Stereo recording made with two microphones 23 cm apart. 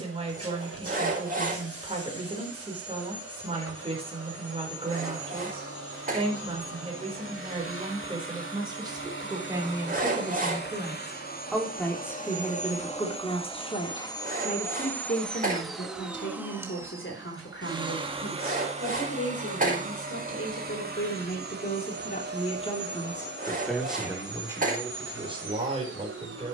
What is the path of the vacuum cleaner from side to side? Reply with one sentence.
You can hear the vacuum cleaner move to the right.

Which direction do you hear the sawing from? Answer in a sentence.
You can hear the sawing on the right.